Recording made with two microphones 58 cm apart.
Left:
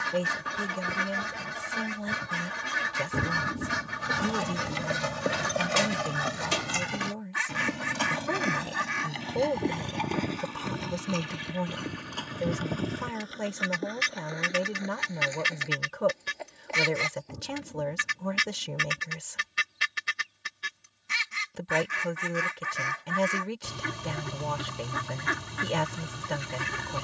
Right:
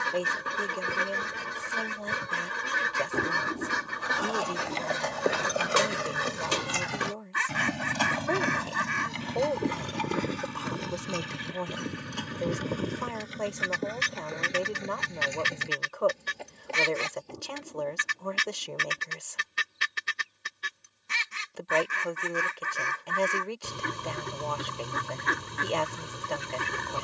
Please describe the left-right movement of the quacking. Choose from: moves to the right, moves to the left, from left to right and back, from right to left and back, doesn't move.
doesn't move.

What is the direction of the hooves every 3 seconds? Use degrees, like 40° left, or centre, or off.
off, 30° left, 10° right, 40° right, 50° right, 50° right, off, off, off.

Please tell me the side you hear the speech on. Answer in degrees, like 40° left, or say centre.
40° left.